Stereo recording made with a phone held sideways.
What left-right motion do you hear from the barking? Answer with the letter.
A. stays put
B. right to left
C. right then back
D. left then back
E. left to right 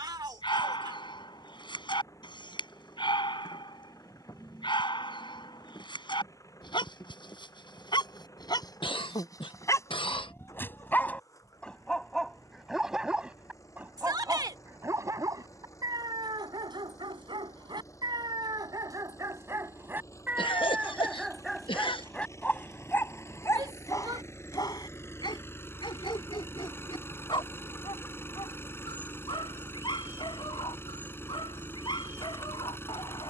C.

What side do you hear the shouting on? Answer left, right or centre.
right.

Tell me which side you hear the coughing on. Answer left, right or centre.
left.